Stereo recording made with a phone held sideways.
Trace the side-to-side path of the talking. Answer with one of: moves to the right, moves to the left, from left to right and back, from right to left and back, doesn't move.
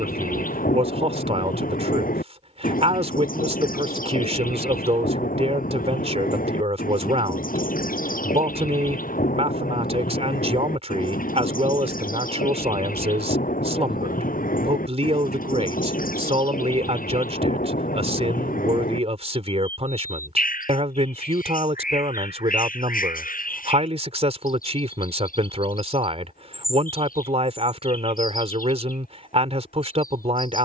doesn't move.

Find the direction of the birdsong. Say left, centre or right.
left.